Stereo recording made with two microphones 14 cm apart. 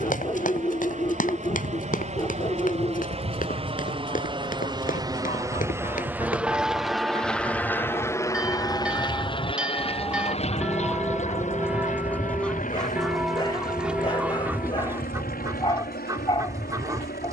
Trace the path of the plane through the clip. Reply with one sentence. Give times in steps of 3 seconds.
In this clip you hear the plane on the right from 0 s, in the centre from 6 s and on the left from 9 s.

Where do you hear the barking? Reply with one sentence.
In this clip you hear the barking on the left.